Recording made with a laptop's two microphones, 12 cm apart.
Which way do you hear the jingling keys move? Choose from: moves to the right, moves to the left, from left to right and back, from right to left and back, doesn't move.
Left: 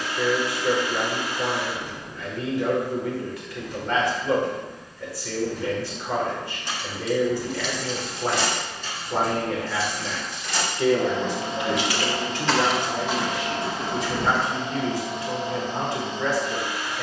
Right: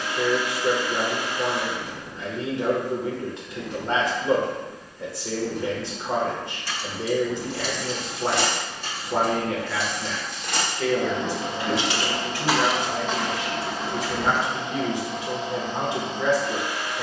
from left to right and back.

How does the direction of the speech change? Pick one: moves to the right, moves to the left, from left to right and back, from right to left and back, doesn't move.
from right to left and back.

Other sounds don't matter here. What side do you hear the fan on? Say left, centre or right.
right.